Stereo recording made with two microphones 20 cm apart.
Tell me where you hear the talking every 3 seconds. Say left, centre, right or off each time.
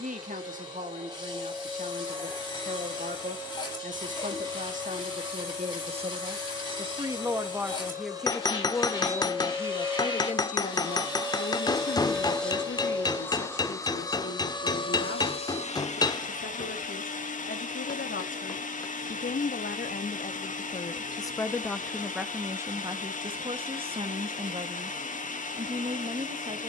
right, right, centre, left, left, left, left, centre, right.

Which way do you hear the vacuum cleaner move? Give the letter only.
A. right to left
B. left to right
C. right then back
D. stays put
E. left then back
A.